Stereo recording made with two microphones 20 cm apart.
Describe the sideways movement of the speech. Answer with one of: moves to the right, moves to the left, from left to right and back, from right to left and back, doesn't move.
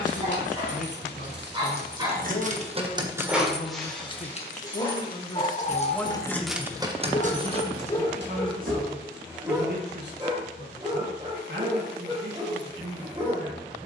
moves to the right.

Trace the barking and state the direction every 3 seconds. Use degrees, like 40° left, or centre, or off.
30° right, 20° left, 30° left, 20° right, 30° right.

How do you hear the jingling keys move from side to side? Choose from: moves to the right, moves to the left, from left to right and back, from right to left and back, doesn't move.
from right to left and back.